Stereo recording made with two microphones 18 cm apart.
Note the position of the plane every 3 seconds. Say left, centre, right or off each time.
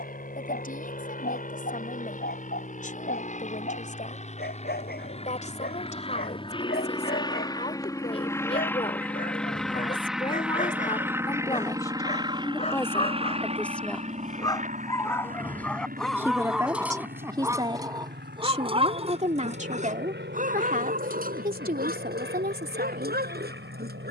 left, left, left, centre, right, right, right, right.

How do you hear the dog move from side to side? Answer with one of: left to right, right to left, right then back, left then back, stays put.
left to right.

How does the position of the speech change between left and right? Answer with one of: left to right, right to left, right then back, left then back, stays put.
left to right.